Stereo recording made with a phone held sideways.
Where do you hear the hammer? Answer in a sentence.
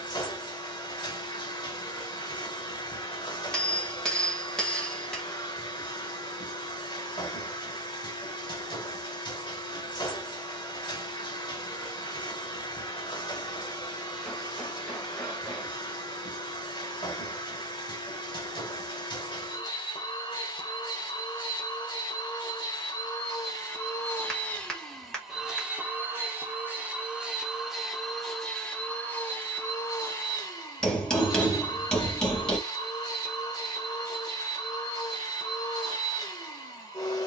You can hear the hammer in the centre.